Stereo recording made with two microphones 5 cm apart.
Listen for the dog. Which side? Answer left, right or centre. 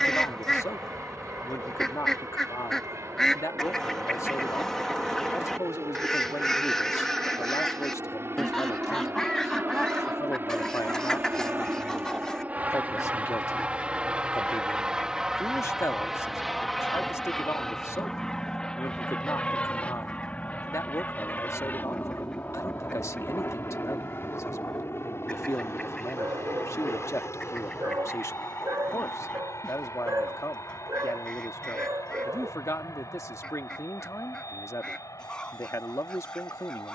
right.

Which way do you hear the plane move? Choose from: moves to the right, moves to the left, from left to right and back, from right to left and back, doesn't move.
moves to the left.